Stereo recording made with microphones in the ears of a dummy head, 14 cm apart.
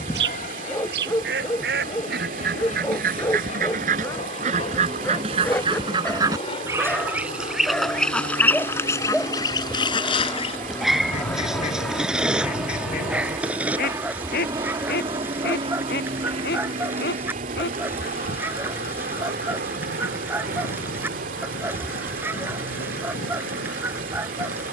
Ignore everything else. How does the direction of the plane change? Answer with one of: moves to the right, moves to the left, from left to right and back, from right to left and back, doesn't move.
moves to the right.